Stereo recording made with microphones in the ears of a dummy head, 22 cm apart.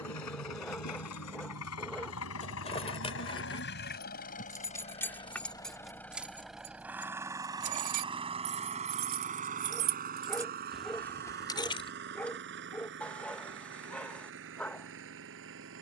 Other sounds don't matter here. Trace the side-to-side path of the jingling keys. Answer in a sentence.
In this clip you hear the jingling keys move from left to right and back again.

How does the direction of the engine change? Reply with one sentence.
You can hear the engine go from the left side to the right.